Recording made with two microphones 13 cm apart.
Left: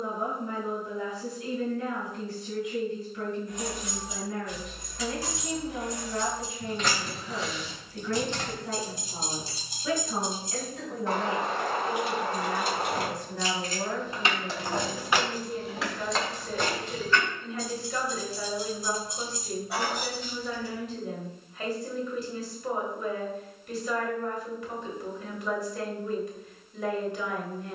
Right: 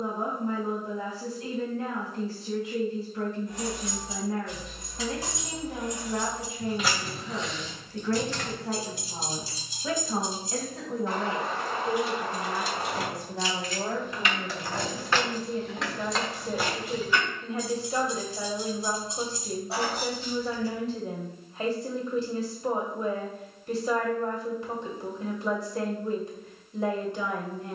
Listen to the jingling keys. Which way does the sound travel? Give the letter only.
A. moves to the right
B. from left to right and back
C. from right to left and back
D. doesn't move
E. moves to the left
C.